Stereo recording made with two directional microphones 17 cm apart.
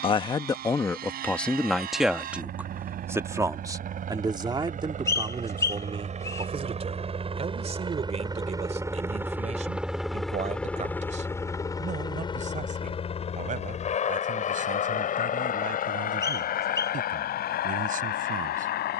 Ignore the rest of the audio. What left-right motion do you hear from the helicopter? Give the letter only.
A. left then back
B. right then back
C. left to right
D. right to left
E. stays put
D.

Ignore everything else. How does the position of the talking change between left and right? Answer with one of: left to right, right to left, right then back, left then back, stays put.
left to right.